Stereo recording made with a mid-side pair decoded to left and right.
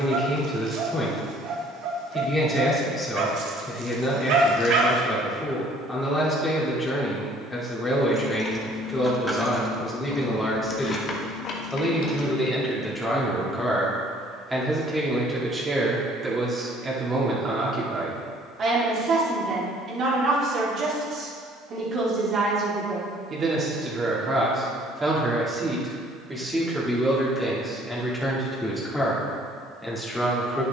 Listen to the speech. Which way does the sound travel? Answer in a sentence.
You can hear the speech move from left to right and back again.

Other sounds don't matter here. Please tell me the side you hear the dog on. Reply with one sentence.
In this clip you hear the dog on the right.